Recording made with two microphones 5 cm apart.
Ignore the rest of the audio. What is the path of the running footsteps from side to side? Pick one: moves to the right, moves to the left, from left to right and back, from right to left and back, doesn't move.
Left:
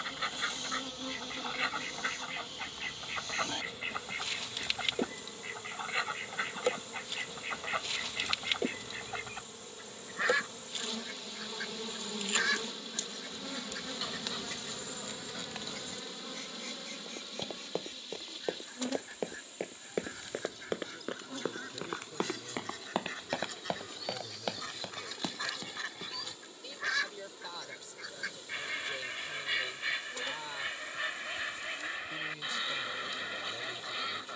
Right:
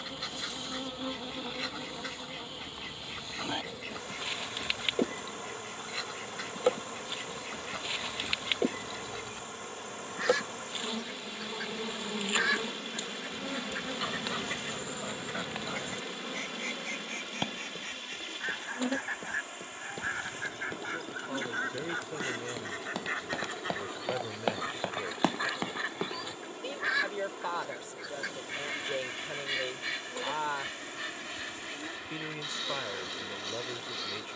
moves to the right.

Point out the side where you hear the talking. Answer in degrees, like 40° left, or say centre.
50° right.